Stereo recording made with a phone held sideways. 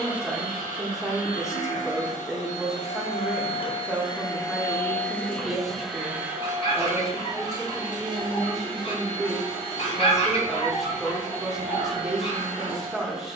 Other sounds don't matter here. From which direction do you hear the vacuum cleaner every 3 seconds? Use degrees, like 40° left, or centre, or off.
70° left, 20° left, 30° right, 40° right, 50° right.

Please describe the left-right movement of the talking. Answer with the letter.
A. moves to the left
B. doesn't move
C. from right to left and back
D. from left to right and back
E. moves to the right
B.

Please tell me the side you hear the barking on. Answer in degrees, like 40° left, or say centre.
50° left.